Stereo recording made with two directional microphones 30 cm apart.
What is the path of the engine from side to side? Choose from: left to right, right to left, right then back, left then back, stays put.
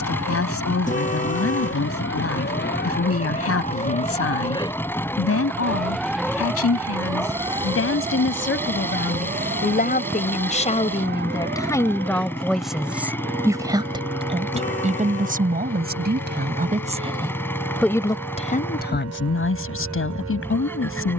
stays put.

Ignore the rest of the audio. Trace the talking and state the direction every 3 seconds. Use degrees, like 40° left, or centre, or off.
50° left, 50° left, 50° left, 20° left, 10° right, 20° right, 40° left.